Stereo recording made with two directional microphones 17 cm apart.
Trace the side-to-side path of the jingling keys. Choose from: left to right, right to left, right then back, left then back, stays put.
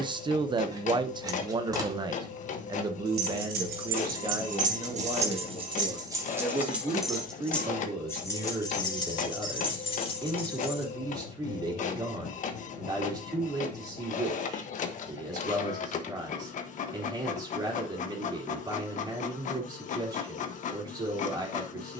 right to left.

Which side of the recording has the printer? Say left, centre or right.
left.